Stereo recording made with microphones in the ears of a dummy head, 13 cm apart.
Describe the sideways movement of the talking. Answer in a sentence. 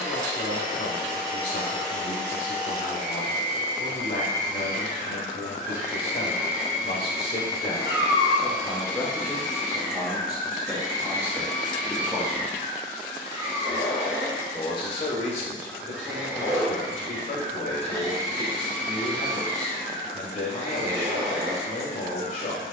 You can hear the talking go right and come back.